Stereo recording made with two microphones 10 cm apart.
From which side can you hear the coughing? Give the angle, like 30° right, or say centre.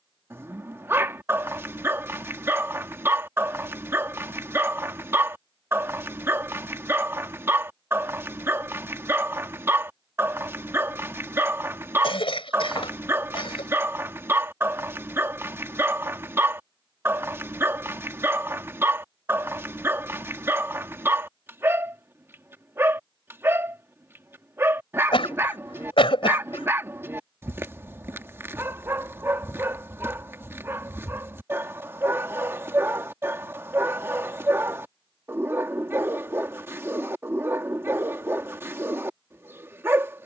60° left.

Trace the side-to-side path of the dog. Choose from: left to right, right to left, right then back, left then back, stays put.
stays put.